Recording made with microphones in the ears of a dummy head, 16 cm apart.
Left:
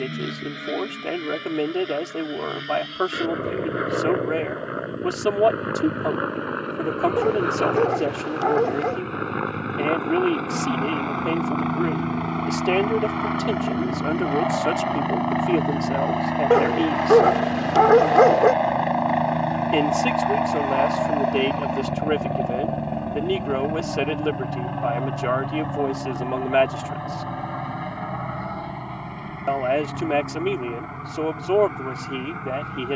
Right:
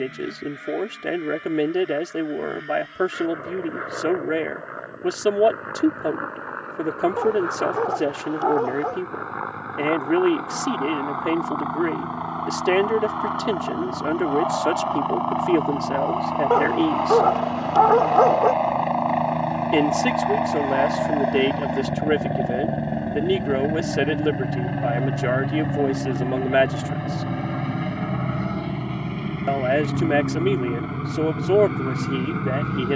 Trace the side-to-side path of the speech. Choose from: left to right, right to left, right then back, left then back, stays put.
stays put.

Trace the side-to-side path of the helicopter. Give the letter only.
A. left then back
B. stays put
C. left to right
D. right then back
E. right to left
C.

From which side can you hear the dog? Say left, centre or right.
left.